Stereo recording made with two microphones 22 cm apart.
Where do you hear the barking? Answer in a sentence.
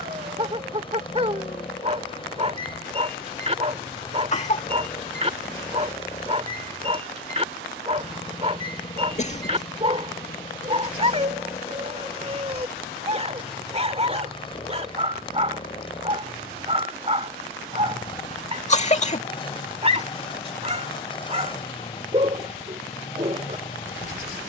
You can hear the barking on the right.